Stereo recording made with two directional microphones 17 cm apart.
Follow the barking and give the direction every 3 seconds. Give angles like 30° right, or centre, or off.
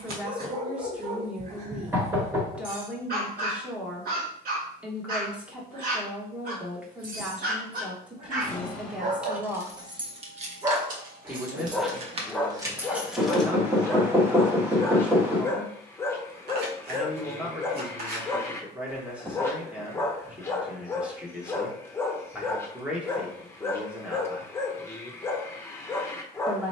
60° right, 60° right, 60° right, 20° right, 10° left, 10° left, 10° left, 10° left, 10° left.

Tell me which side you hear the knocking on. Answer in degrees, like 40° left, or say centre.
10° right.